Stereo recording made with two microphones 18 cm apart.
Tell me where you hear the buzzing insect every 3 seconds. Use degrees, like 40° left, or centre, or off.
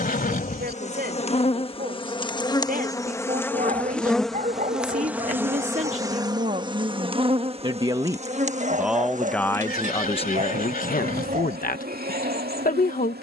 30° left, centre, 30° right, 50° right, 60° right.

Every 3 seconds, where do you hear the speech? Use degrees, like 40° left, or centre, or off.
50° right, 40° right, 30° right, 30° left, 50° left.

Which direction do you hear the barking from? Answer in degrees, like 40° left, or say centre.
40° right.